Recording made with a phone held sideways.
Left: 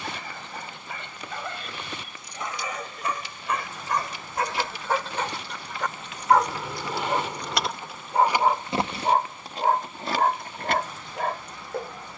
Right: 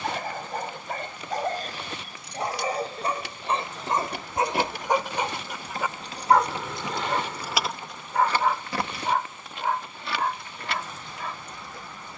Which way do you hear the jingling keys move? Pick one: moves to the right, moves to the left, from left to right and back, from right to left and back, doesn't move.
moves to the left.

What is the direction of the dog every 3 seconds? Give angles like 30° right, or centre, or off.
40° right, 20° right, 10° left, 50° left.